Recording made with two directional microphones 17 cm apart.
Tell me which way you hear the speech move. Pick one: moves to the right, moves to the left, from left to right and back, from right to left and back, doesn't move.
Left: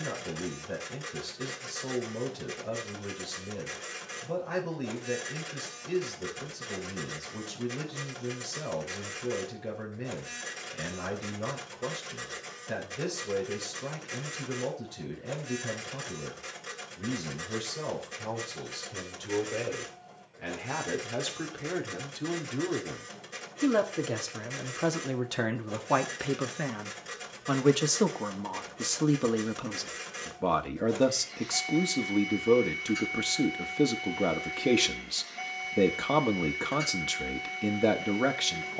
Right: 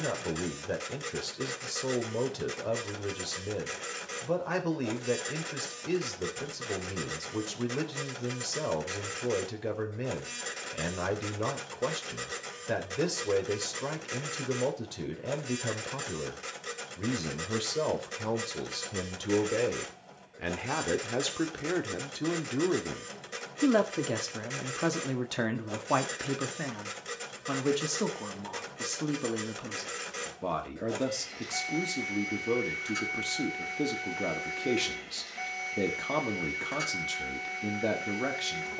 moves to the left.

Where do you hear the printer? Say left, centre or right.
right.